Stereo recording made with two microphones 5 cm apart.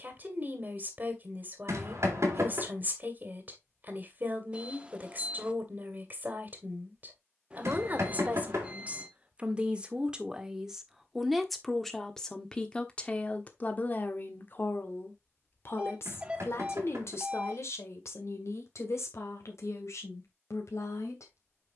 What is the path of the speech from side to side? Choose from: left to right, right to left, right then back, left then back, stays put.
right to left.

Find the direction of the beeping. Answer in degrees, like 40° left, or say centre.
20° right.